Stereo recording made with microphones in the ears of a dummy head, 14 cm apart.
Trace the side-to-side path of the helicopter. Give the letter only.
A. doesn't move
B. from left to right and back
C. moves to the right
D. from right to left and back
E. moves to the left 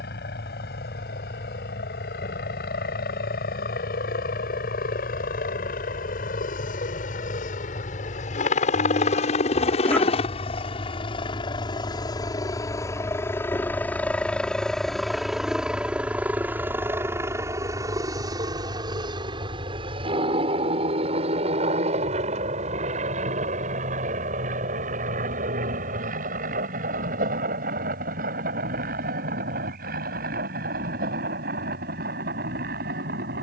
C.